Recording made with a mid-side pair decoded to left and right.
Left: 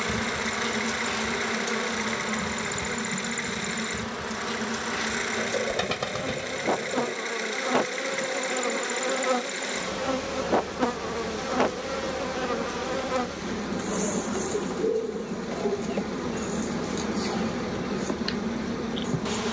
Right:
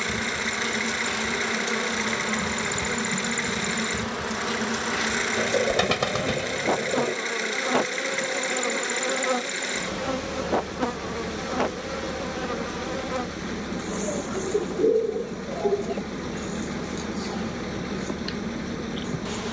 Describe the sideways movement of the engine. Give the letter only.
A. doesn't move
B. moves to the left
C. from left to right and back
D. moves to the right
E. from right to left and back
A.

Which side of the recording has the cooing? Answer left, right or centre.
right.